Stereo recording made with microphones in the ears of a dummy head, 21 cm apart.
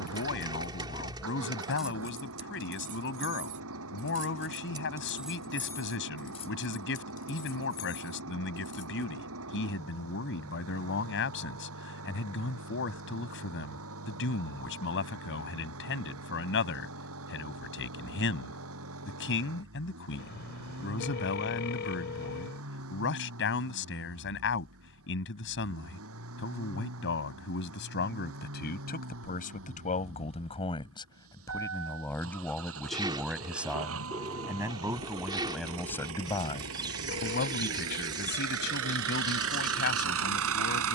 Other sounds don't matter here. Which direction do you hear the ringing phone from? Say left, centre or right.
left.